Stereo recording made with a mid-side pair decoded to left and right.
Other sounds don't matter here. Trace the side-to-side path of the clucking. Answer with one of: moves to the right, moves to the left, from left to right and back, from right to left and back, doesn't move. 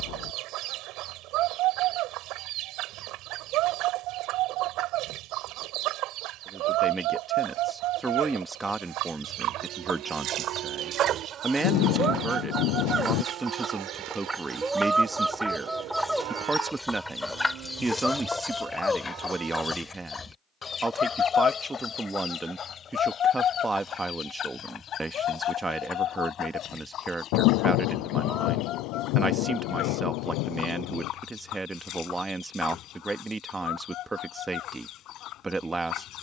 moves to the left.